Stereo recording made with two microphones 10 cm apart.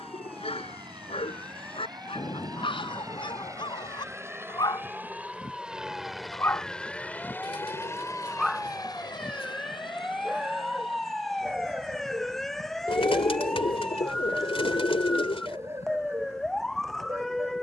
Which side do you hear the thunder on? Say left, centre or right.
left.